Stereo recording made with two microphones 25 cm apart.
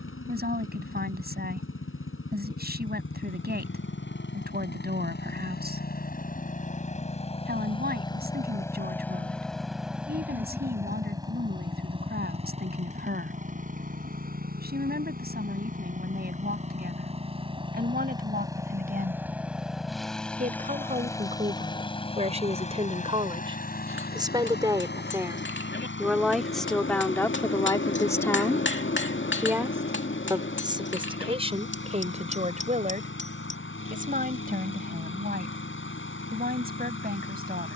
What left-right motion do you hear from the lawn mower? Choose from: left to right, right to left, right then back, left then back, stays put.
right then back.